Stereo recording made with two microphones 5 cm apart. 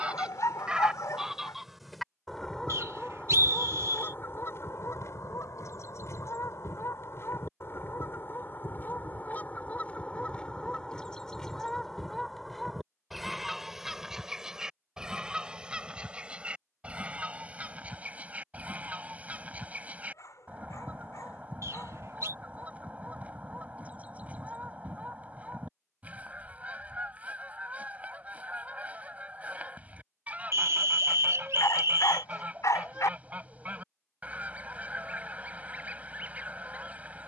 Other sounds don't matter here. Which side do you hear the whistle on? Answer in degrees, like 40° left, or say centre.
60° right.